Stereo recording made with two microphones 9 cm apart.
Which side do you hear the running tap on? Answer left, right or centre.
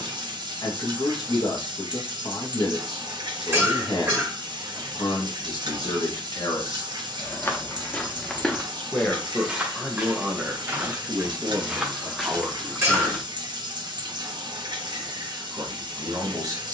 right.